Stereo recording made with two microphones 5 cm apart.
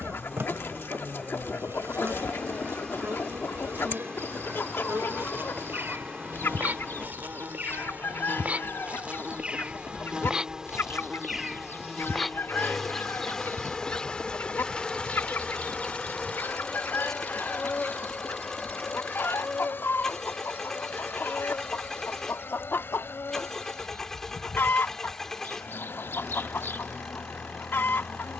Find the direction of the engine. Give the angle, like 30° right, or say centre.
10° left.